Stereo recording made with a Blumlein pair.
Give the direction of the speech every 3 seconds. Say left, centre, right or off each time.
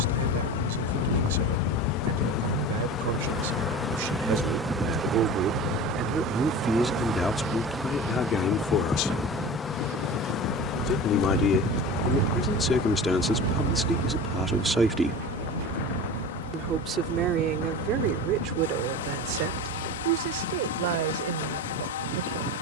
right, right, centre, left, centre, right, right, right.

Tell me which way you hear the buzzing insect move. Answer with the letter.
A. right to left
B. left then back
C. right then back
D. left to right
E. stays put
C.